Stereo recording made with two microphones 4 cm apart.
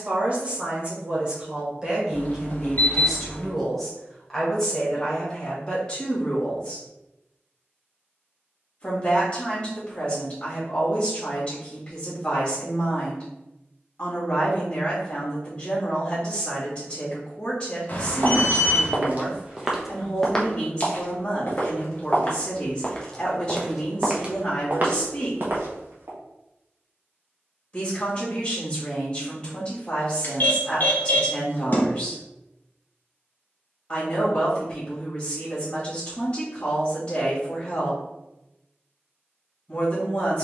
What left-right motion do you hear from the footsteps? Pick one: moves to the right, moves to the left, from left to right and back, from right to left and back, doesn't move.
from right to left and back.